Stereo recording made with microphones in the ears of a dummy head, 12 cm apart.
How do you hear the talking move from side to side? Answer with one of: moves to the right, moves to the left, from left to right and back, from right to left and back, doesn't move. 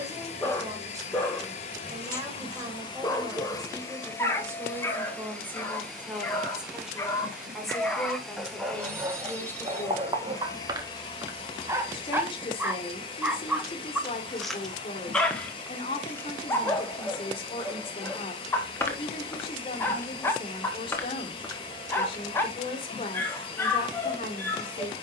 moves to the left.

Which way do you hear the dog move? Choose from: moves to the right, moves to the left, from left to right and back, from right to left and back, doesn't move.
from left to right and back.